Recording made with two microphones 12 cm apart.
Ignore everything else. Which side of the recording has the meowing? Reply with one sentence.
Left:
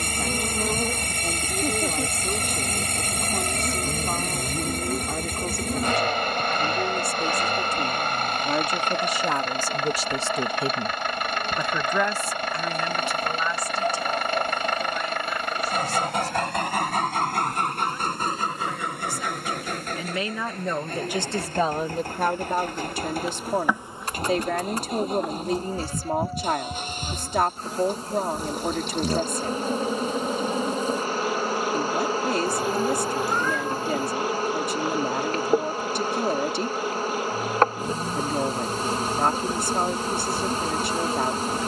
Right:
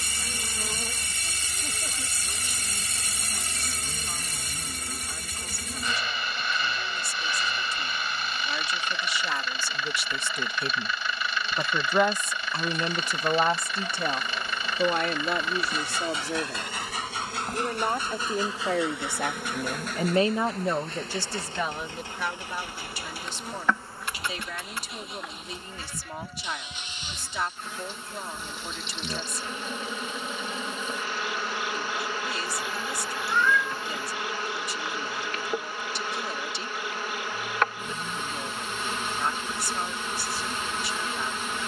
In this clip you hear the meowing on the left.